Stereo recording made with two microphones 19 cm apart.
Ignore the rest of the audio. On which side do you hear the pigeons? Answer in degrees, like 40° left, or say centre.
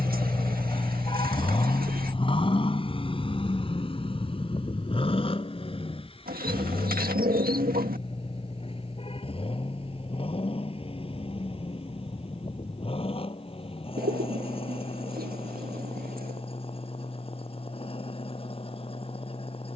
50° right.